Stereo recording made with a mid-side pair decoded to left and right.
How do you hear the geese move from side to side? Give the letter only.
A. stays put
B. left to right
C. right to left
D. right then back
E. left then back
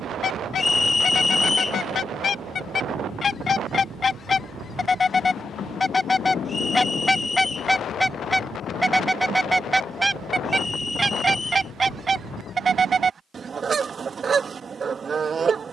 B.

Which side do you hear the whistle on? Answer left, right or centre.
left.